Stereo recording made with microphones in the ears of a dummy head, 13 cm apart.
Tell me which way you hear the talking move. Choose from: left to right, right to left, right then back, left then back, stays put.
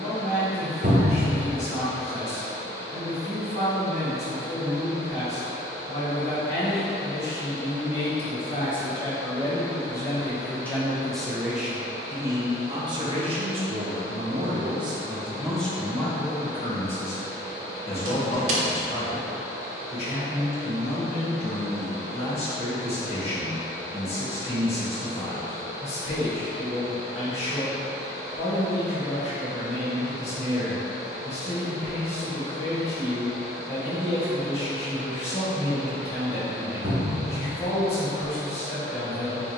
right then back.